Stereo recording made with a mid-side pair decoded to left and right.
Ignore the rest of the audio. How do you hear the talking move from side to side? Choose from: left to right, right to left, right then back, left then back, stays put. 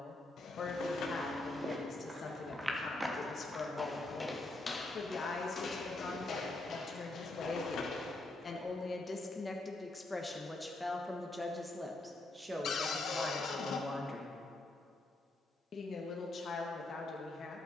right then back.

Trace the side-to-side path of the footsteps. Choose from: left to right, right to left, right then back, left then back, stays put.
right to left.